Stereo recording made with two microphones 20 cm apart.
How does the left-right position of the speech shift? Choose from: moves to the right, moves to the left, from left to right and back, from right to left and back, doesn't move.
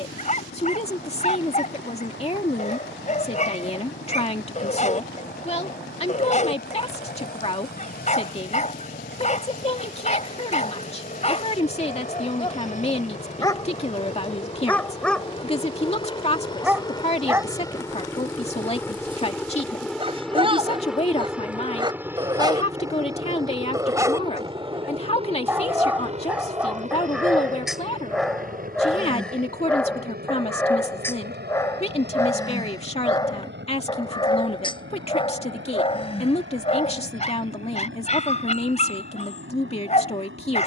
doesn't move.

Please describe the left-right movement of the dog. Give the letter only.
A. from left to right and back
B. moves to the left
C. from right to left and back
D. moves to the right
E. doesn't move
A.